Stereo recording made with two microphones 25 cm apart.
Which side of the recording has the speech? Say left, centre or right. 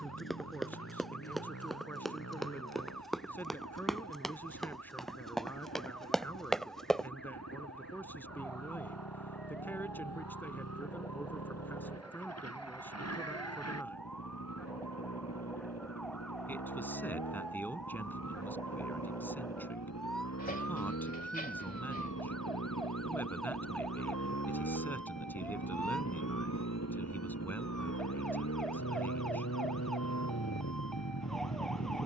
centre.